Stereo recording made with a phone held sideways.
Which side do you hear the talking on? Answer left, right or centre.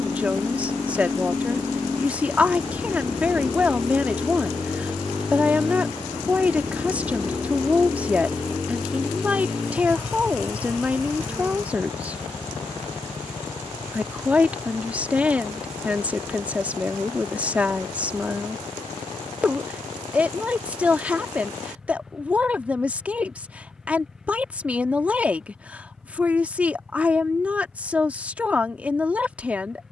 centre.